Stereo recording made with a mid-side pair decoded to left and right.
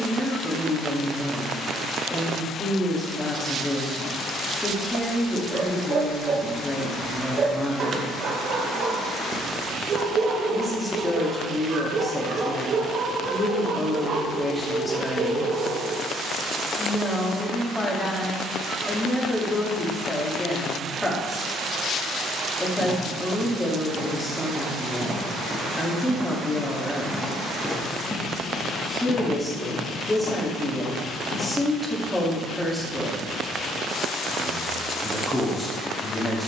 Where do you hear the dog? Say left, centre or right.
right.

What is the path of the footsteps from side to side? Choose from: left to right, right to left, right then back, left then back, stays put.
right to left.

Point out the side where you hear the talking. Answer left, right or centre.
centre.